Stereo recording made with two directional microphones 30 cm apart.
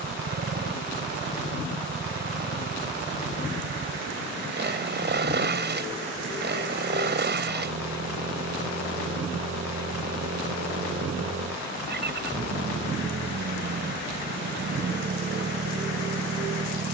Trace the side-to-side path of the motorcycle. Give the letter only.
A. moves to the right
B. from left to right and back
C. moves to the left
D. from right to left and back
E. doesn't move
E.